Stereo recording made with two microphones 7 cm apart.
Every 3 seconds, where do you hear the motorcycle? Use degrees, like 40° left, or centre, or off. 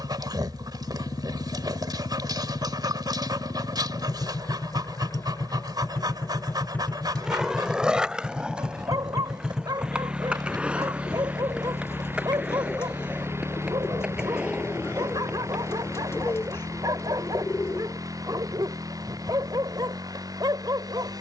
60° left, 40° left, 10° left, 20° right, 40° right, 50° right, 50° right.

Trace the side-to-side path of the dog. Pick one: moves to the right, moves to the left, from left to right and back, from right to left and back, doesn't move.
doesn't move.